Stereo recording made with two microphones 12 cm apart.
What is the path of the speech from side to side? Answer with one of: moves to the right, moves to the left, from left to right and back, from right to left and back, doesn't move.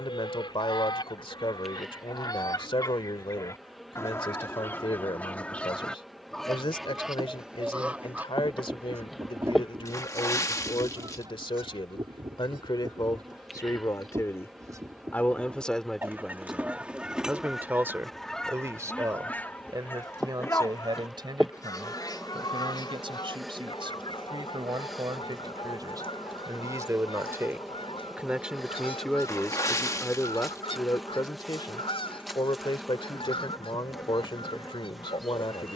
from left to right and back.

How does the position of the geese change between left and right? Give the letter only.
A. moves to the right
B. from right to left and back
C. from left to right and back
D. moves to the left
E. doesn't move
C.